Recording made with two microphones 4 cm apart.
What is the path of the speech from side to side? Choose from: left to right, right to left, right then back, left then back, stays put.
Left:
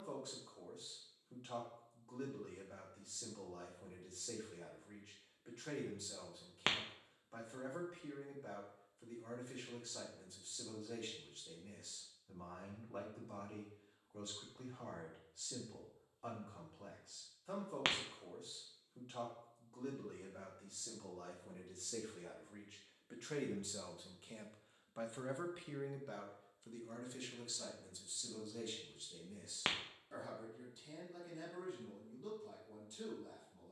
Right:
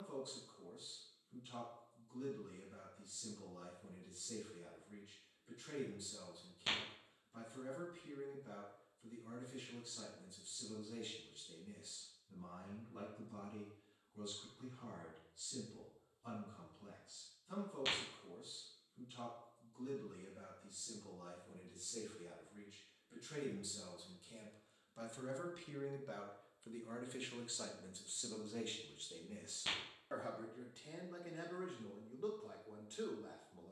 left to right.